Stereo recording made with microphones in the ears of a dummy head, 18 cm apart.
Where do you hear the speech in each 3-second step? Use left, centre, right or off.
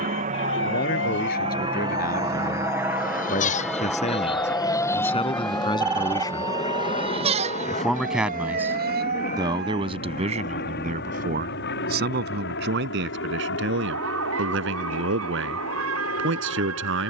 left, left, centre, right, right, right.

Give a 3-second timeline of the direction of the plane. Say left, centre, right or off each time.
right, centre, left, left, left, left.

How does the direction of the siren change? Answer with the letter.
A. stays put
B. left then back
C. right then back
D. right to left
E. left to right
E.